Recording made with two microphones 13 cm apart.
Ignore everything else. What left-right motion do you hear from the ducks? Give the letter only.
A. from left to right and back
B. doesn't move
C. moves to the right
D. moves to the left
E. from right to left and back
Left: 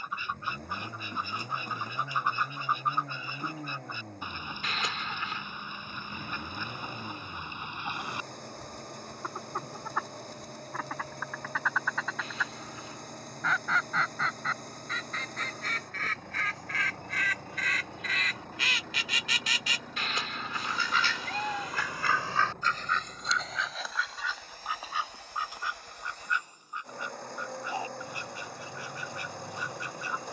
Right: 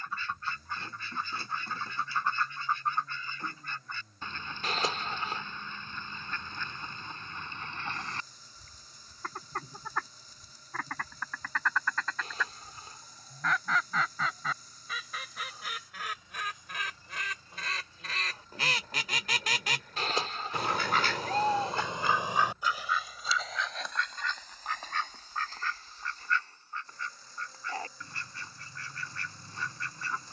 A.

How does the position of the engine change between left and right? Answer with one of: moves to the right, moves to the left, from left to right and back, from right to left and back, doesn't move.
doesn't move.